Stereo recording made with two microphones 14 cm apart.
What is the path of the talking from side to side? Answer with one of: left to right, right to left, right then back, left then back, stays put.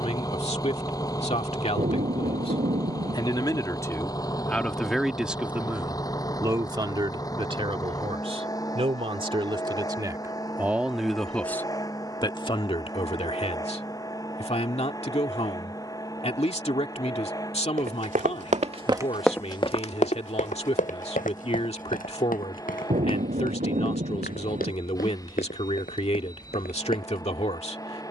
right then back.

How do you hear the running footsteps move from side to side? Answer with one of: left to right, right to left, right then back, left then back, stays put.
right to left.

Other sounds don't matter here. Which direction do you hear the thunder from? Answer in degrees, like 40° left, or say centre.
60° right.